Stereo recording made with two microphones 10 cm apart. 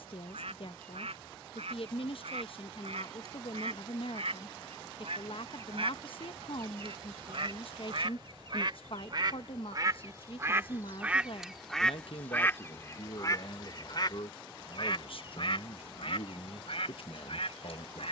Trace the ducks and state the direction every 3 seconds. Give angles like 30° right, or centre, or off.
80° right, 70° right, 60° right, 20° right, 40° left, 70° left.